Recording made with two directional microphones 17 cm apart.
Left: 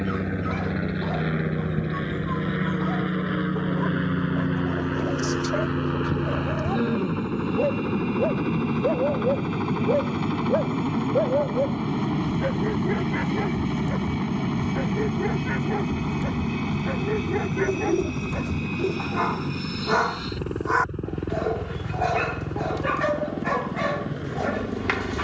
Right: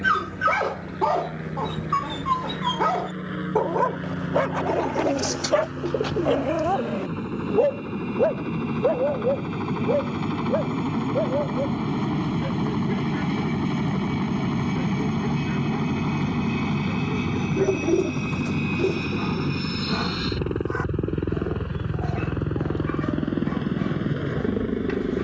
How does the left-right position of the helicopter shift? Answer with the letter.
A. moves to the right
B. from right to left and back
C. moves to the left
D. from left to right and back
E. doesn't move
A.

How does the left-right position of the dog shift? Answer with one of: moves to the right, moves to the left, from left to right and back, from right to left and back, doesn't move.
moves to the left.